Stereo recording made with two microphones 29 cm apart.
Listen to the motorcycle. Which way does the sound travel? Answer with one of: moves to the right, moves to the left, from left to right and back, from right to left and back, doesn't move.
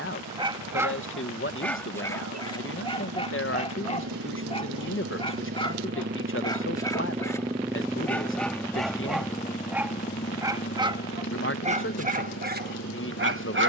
moves to the left.